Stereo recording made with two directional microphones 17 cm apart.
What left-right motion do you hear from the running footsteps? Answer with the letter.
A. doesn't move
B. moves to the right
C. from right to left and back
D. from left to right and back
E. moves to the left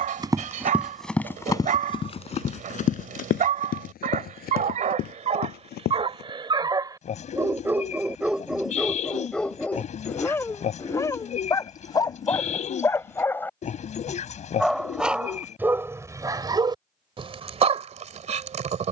E.